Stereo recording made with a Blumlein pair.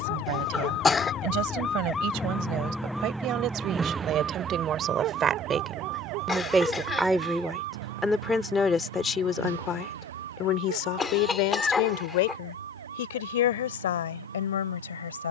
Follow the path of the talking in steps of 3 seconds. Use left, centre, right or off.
right, right, centre, left, left.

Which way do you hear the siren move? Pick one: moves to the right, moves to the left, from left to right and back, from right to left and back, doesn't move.
moves to the right.